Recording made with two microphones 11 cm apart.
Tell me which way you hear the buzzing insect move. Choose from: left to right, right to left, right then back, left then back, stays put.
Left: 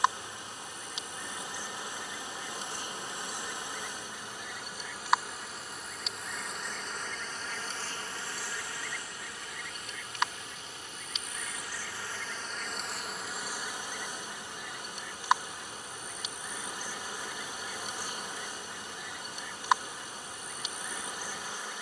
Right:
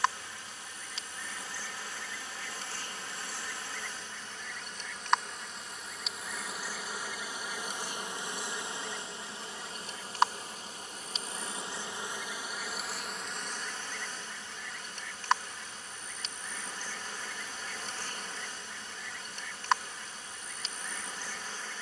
right then back.